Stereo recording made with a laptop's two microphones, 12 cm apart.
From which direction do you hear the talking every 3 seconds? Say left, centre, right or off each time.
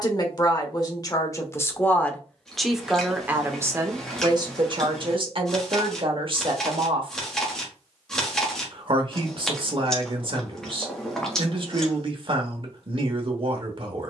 left, right, right, right, right.